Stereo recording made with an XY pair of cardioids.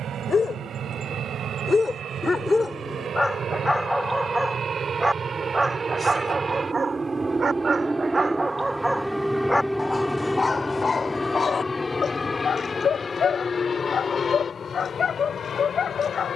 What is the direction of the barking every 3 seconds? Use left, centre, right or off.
left, centre, right, left, left, left.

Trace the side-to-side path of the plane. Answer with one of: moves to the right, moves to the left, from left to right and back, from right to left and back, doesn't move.
moves to the left.